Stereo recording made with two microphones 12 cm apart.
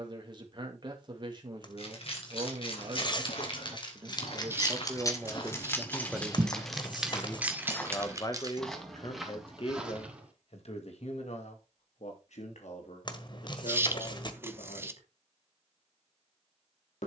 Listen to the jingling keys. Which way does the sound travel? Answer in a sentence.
You can hear the jingling keys move from left to right.